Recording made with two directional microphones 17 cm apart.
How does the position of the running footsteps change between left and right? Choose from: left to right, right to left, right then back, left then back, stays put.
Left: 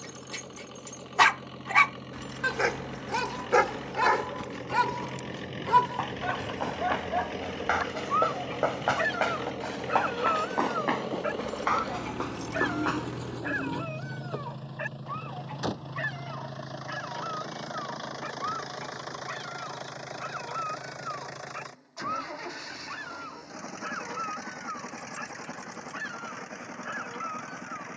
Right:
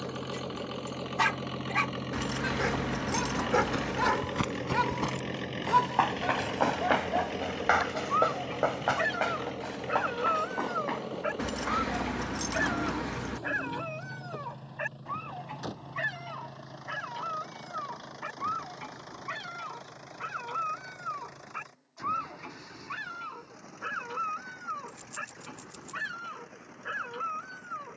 right to left.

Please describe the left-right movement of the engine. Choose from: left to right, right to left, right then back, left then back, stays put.
right to left.